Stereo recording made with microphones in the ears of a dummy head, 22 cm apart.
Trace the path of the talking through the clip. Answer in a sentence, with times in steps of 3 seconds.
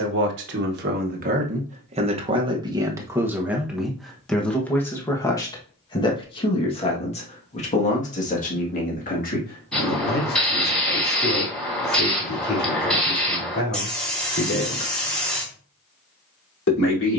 In this clip you hear the talking on the right from 0 s, in the centre from 3 s and on the left from 6 s.